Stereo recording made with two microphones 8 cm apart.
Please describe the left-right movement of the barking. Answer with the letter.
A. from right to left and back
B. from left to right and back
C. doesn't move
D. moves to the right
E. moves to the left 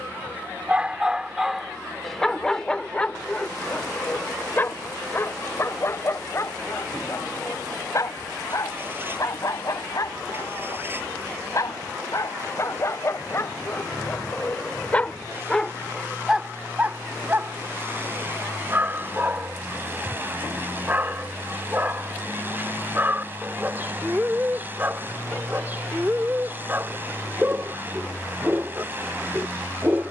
A.